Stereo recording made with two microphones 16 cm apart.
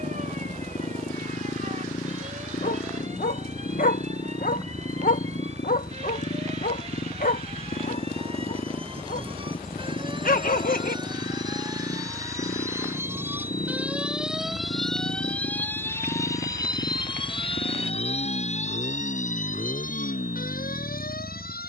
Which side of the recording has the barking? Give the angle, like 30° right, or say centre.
60° left.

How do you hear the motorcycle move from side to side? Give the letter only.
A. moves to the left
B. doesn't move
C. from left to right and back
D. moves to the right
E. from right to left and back
B.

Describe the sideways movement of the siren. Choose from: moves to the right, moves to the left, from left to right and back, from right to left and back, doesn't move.
moves to the left.